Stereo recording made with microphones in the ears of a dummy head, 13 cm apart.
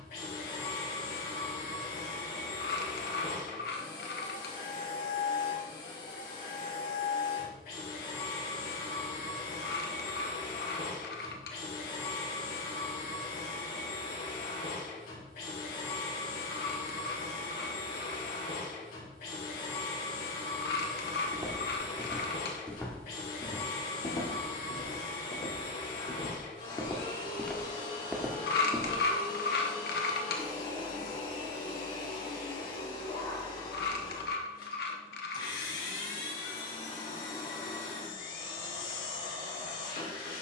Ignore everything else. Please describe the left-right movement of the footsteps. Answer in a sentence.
In this clip you hear the footsteps go left and come back.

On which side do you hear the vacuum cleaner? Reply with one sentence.
You can hear the vacuum cleaner on the left.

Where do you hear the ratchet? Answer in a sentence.
In this clip you hear the ratchet on the left.